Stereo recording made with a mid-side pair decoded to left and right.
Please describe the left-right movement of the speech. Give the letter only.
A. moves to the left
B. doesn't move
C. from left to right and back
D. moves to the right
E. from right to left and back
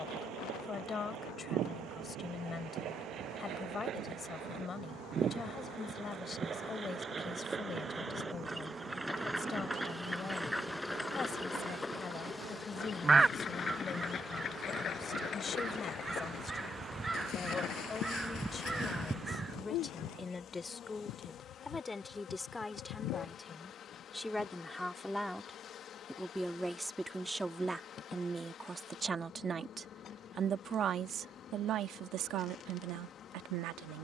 D.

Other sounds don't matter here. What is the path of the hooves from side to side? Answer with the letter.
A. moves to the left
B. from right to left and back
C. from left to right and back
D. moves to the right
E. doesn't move
A.